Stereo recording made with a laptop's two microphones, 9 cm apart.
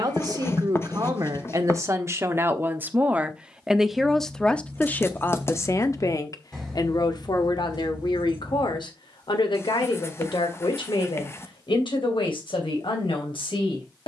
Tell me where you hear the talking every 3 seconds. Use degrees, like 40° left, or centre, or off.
40° right, 10° left, 60° left, 70° left, 80° left.